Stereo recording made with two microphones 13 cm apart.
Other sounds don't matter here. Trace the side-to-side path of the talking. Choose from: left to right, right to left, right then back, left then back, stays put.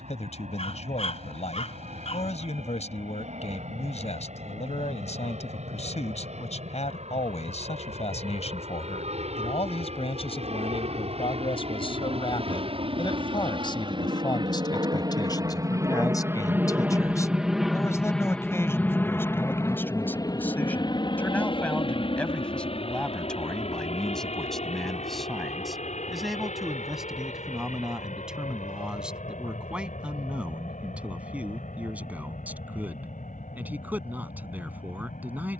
left to right.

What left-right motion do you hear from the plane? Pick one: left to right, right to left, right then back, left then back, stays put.
right to left.